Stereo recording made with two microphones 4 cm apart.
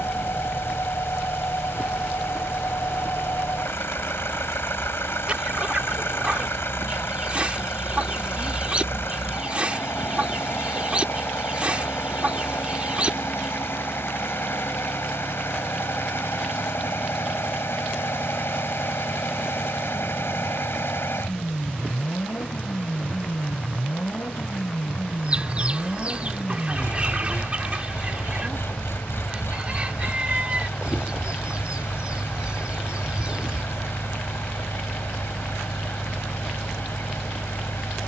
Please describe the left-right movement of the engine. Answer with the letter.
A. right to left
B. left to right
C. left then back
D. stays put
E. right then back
D.